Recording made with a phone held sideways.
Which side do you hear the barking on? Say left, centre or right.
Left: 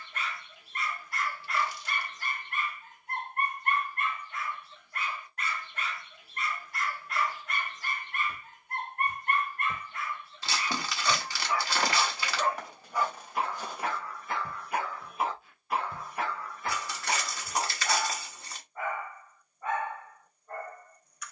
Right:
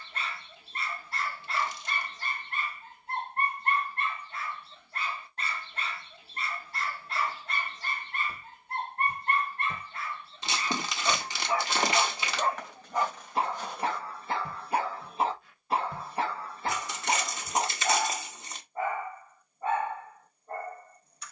right.